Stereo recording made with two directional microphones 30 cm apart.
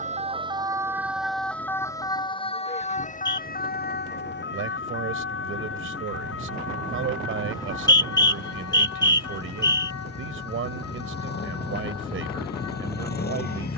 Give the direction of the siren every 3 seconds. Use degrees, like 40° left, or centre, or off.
centre, 40° left, 50° left, 60° left, 60° left.